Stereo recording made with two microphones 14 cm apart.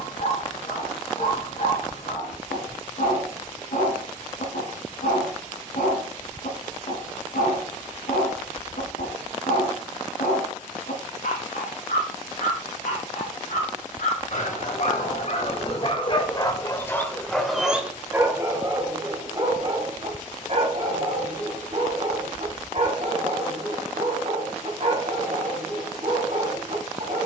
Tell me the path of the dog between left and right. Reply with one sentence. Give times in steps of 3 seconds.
You can hear the dog on the left from 0 s and on the right from 18 s.